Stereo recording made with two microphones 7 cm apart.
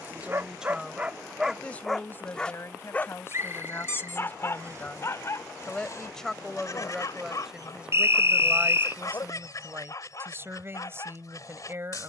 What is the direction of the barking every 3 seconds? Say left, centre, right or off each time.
centre, left, left, left.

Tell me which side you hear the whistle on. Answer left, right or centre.
right.